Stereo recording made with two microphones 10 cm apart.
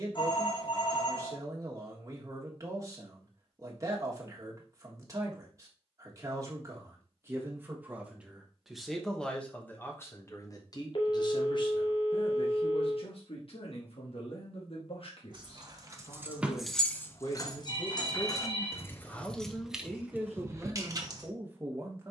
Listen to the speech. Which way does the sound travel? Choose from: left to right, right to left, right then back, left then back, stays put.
left then back.